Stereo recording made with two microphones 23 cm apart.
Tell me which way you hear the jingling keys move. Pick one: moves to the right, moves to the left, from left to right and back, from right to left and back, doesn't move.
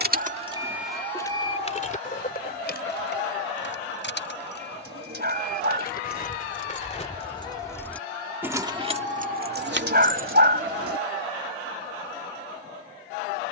from right to left and back.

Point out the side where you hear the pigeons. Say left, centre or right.
right.